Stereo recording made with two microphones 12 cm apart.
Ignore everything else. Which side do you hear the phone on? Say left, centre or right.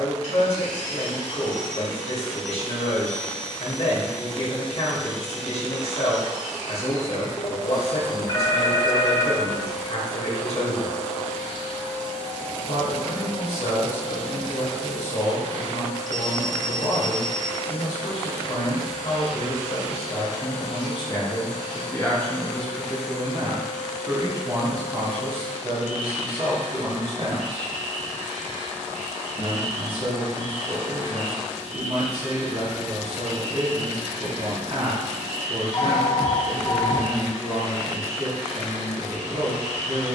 left.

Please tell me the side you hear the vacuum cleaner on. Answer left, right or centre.
right.